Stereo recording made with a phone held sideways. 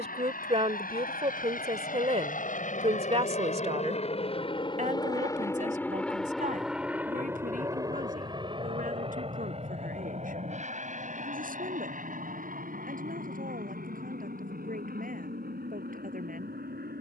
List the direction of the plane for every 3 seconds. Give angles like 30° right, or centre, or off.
70° left, 30° left, 10° right, 40° right, 50° right, 60° right.